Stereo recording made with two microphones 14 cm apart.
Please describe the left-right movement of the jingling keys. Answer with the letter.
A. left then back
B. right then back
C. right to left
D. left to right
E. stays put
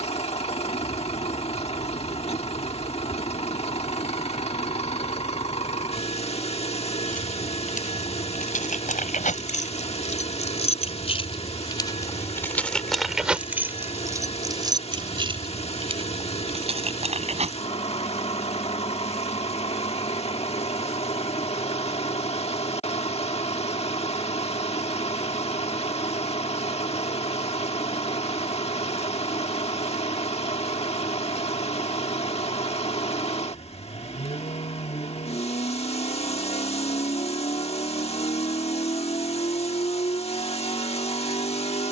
D.